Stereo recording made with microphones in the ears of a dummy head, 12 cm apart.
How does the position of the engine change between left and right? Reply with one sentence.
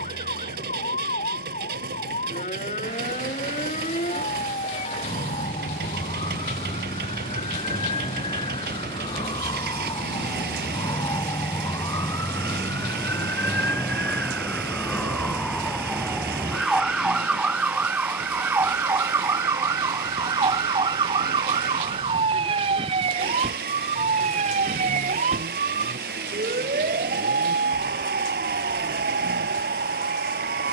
You can hear the engine stay put.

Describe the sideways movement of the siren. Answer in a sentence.
In this clip you hear the siren travel towards the right.